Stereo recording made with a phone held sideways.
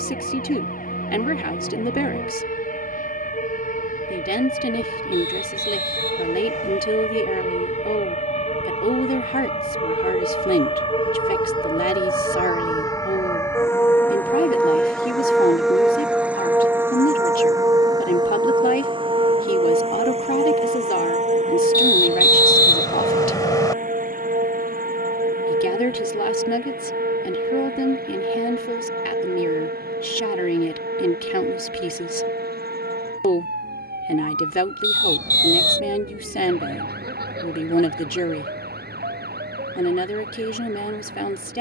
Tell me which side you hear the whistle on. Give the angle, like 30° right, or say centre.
20° left.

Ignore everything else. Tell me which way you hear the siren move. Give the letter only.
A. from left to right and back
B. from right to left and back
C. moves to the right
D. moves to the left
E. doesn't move
C.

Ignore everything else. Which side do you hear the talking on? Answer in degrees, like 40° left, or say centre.
70° left.